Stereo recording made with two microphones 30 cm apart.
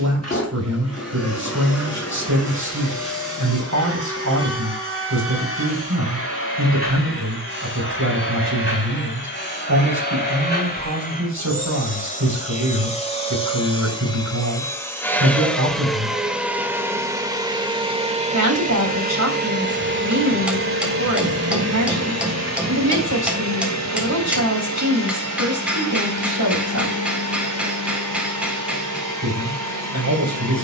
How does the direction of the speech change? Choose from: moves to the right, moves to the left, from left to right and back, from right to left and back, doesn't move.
doesn't move.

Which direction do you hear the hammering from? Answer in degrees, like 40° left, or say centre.
centre.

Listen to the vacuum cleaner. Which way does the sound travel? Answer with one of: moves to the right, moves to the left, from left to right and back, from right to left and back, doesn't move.
moves to the right.